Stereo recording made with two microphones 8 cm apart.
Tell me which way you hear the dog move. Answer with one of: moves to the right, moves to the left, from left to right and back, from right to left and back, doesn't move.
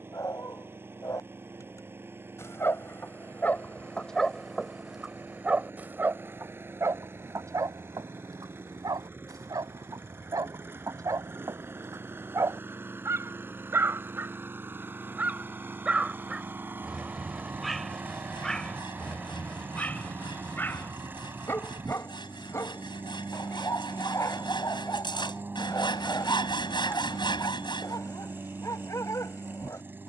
from left to right and back.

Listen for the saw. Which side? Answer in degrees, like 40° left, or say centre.
70° left.